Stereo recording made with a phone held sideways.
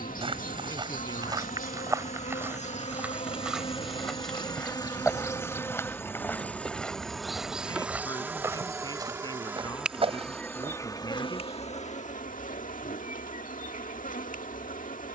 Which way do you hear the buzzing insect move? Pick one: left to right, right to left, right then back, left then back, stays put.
right then back.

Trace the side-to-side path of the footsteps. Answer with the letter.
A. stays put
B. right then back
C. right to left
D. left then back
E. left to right
D.